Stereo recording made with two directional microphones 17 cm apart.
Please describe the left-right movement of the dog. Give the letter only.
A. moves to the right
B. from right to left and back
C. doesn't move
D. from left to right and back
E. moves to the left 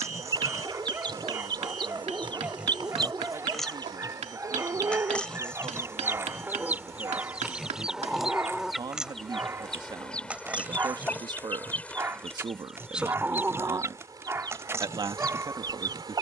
C.